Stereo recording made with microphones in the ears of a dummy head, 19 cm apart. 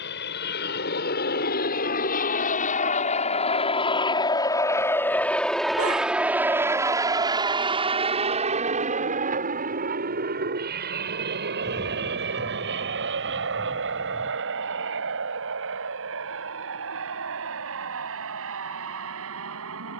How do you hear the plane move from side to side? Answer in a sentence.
In this clip you hear the plane move from left to right.